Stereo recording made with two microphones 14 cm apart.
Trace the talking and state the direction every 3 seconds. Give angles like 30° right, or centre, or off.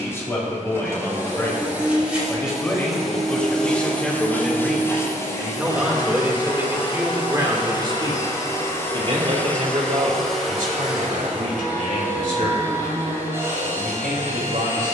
20° left, centre, 20° right, 60° right, 80° right.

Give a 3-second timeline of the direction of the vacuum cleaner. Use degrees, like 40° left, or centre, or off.
10° right, 20° left, 30° left, centre, 20° right.